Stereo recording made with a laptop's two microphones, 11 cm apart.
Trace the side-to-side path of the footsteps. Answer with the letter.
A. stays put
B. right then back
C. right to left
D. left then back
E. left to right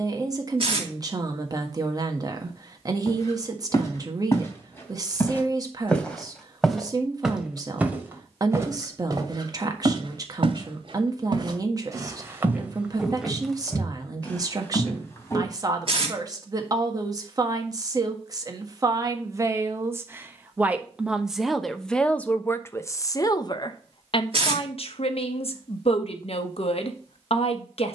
B.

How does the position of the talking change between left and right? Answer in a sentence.
In this clip you hear the talking travel towards the left.